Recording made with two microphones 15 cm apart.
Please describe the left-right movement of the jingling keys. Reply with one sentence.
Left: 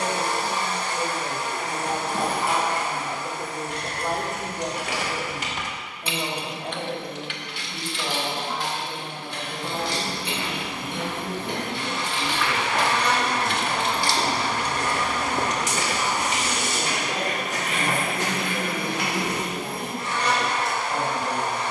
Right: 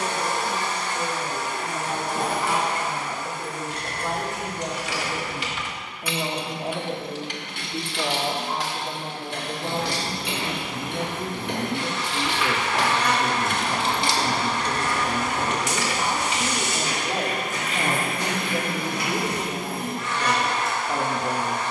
You can hear the jingling keys go right and come back.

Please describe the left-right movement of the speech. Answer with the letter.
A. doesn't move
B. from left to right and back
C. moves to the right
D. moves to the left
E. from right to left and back
C.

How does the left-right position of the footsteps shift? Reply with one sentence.
You can hear the footsteps move to the left.